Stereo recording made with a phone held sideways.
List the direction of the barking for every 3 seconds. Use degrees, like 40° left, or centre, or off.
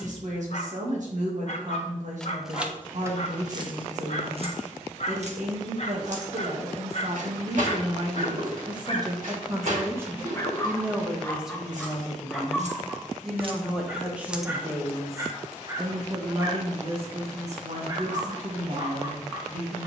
50° left, 50° left, 50° left, 20° left, 10° right, 30° right, 30° right.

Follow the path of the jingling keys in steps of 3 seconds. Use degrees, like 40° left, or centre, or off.
10° right, 40° right, 70° right, 70° right, 40° right, off, off.